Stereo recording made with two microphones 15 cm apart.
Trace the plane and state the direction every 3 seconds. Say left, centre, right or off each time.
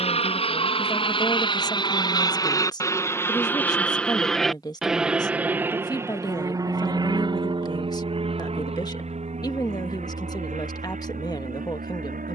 left, centre, right, right.